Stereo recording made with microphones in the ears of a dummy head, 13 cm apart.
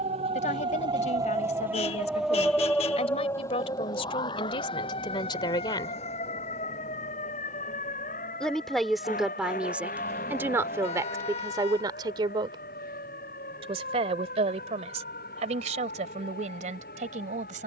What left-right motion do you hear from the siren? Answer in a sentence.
You can hear the siren travel towards the left.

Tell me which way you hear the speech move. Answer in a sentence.
You can hear the speech go from the left side to the right.